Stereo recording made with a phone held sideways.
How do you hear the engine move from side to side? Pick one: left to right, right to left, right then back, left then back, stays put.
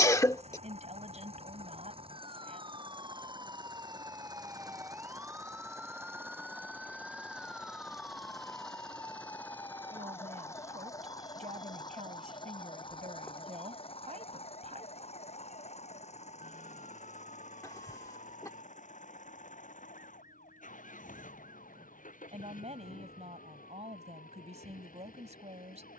right to left.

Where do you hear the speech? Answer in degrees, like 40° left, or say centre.
50° right.